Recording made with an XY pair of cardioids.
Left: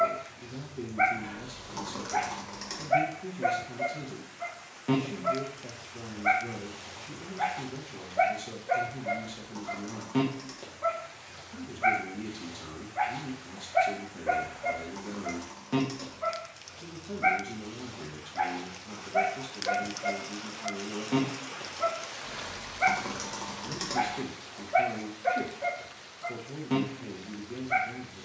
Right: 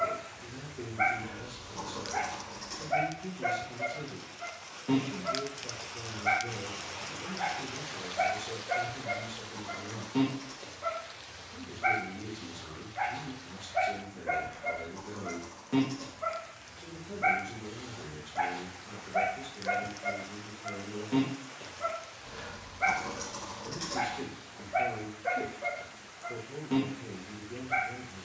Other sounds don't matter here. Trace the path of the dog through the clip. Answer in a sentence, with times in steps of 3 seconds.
You can hear the dog on the left from 0 s, in the centre from 15 s and on the left from 21 s.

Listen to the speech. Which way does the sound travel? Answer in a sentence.
In this clip you hear the speech stay put.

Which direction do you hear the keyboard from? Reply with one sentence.
In this clip you hear the keyboard on the left.